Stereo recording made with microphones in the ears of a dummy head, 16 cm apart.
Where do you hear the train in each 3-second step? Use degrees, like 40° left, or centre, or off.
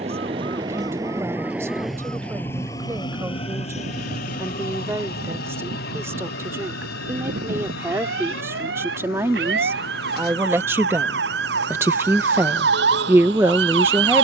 10° right, 50° left, 70° left, 80° left, 80° left.